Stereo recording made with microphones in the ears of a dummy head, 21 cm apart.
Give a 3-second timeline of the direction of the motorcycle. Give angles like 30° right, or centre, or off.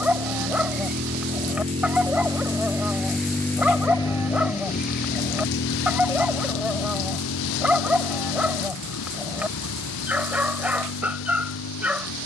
30° right, 30° left, 60° left, 80° left.